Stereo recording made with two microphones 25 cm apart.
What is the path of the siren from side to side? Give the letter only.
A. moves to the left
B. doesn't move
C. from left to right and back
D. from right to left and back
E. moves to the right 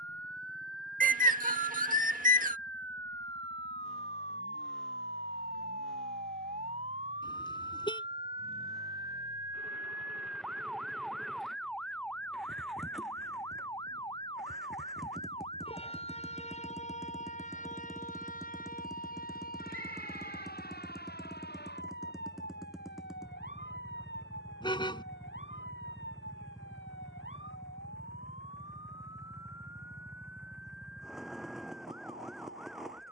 A.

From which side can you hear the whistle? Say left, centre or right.
right.